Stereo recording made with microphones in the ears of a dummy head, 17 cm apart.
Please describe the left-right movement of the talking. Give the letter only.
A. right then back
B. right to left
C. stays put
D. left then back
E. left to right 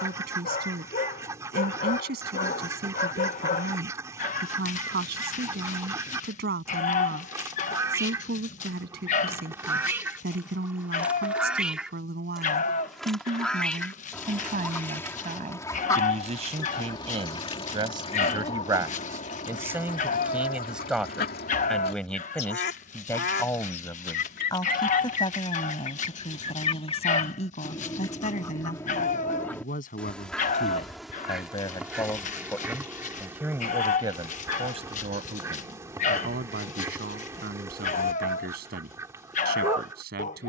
D.